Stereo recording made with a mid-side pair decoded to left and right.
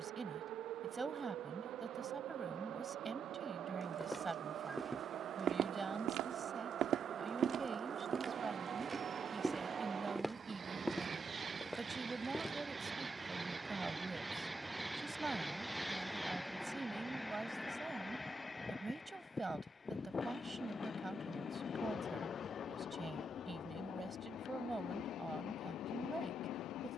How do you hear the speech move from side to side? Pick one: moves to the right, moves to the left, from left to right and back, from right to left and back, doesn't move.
doesn't move.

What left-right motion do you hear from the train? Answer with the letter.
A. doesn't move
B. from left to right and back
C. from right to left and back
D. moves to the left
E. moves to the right
D.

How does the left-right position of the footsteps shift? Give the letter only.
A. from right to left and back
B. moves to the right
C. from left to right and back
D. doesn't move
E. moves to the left
C.